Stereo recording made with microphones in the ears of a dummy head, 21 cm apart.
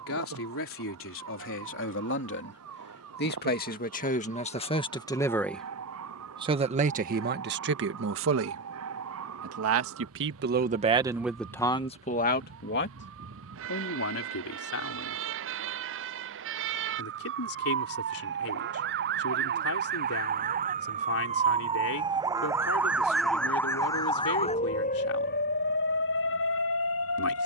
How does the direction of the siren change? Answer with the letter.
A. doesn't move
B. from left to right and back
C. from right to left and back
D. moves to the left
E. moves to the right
D.